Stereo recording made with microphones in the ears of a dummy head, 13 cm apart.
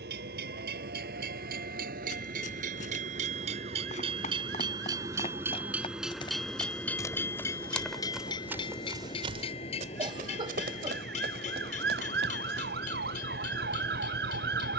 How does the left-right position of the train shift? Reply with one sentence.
You can hear the train move to the left.